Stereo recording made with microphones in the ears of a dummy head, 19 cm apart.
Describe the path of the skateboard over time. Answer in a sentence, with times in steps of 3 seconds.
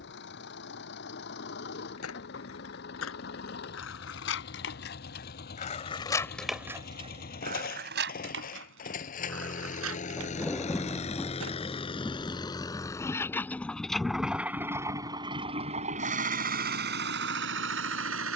In this clip you hear the skateboard on the left from 0 s, on the right from 6 s and not at all from 12 s.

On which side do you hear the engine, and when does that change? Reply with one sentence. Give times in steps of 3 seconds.
You can hear the engine on the left from 0 s, in the centre from 12 s and on the right from 15 s.